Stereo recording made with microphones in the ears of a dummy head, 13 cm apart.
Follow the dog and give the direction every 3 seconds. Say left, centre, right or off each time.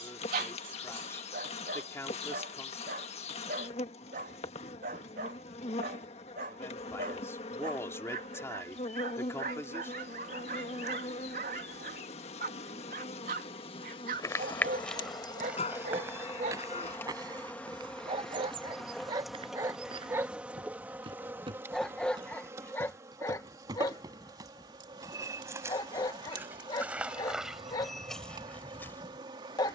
right, right, right, right, right, right, right, centre, left, left.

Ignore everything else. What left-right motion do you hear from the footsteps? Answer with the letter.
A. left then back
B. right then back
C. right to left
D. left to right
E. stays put
B.